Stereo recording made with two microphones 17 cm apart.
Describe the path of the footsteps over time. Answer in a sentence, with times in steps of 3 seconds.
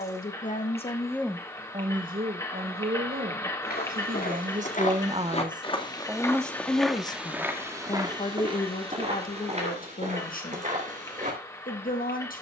In this clip you hear the footsteps not at all from 0 s, on the left from 3 s, in the centre from 6 s and on the right from 9 s.